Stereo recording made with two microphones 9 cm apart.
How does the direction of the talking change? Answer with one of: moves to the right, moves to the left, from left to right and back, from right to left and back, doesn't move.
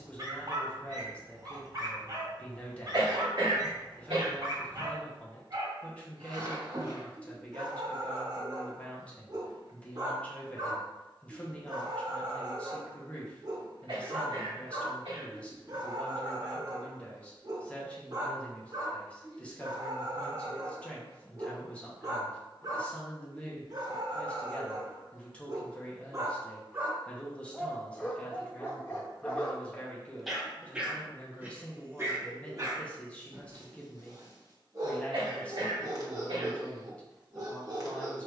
doesn't move.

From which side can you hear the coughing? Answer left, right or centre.
right.